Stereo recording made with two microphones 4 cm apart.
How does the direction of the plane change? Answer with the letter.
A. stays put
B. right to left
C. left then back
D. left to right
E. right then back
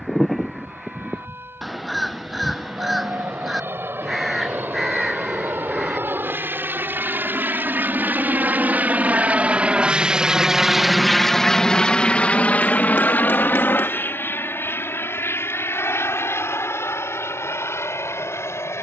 B.